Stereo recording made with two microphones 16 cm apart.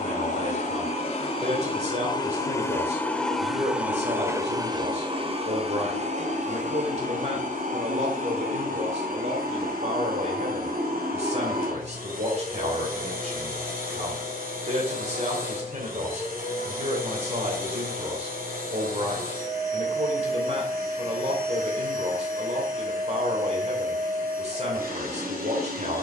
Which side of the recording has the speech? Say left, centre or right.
right.